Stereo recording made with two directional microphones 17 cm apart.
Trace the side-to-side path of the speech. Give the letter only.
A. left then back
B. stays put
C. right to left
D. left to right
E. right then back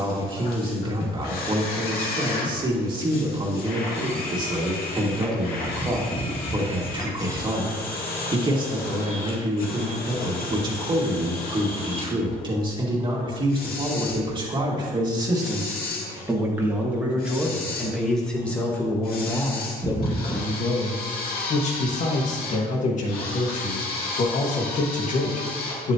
C.